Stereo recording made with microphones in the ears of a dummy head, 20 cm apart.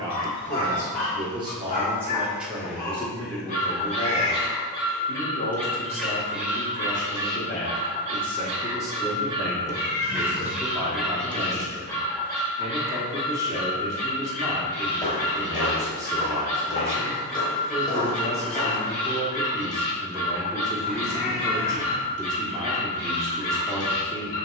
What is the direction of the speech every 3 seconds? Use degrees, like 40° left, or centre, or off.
20° right, 30° left, 30° left, 10° right, 20° right, 20° right, 20° right, 20° right.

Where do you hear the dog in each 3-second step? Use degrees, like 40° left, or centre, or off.
30° left, 20° left, 20° right, 10° right, 30° left, 30° left, 30° left, 30° left.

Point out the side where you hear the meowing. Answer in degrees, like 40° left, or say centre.
60° left.